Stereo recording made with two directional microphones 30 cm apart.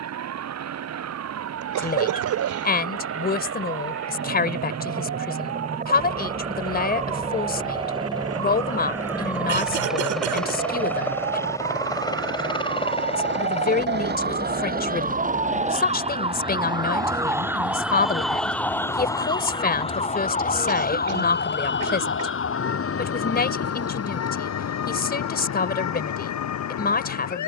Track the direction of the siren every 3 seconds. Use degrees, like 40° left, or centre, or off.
60° right, 60° right, 60° right, 50° right, 40° right, 20° right, 10° left, 40° left, 60° left.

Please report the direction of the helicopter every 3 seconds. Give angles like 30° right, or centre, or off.
60° right, 40° right, 20° right, centre, 20° left, 30° left, 40° left, 50° left, 50° left.